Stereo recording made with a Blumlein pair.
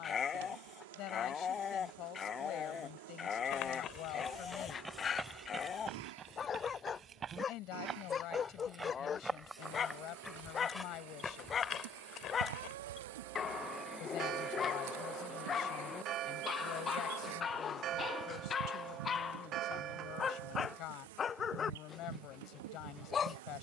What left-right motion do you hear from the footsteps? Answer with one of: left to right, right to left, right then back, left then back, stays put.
right then back.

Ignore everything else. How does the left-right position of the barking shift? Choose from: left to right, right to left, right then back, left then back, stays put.
stays put.